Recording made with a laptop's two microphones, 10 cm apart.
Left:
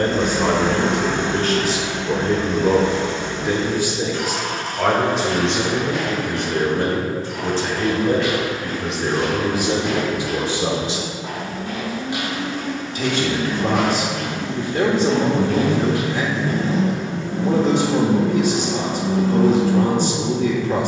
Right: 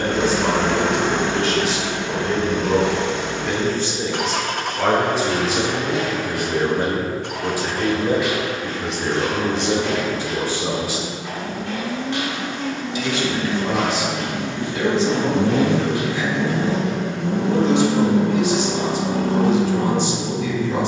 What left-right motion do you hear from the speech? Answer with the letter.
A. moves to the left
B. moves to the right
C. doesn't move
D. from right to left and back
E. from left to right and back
E.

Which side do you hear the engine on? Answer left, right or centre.
right.